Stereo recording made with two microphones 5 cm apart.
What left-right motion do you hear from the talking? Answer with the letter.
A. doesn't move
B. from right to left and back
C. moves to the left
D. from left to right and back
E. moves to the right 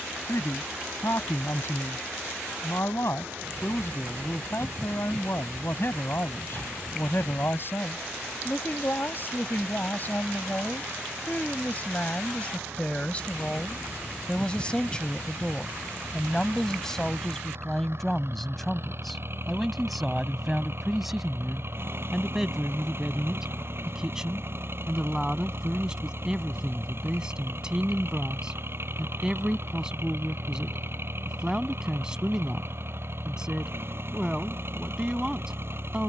E.